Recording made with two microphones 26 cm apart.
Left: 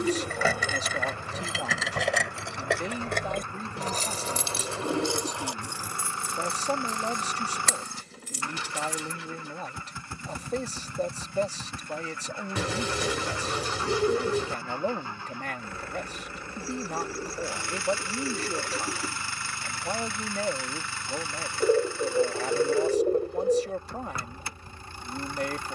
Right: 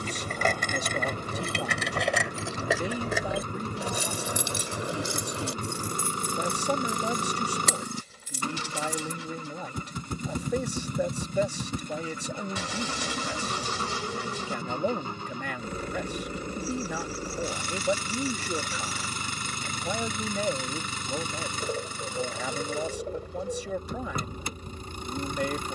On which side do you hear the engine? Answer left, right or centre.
right.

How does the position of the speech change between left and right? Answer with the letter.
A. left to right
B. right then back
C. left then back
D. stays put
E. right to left
D.